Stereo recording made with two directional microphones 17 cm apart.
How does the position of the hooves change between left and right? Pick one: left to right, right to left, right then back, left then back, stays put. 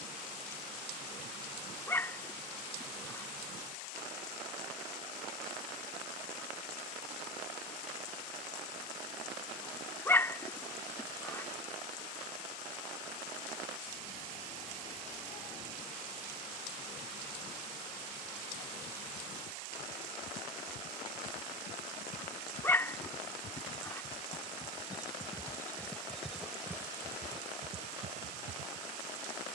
left to right.